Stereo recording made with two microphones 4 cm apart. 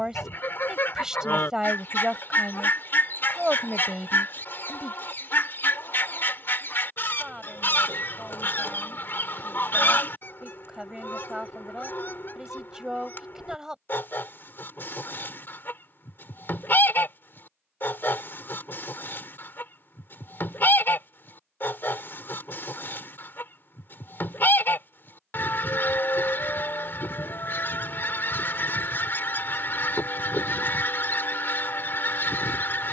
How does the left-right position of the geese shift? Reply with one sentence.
You can hear the geese stay in one place.